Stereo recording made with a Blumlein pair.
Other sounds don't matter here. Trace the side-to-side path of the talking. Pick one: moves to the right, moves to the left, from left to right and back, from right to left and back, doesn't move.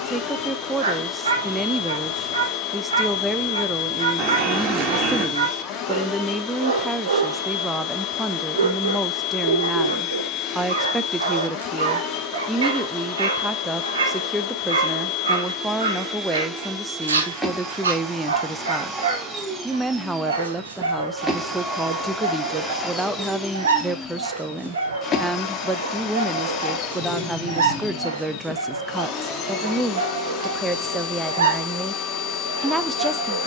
doesn't move.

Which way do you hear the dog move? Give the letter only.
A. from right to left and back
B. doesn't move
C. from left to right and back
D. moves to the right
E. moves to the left
B.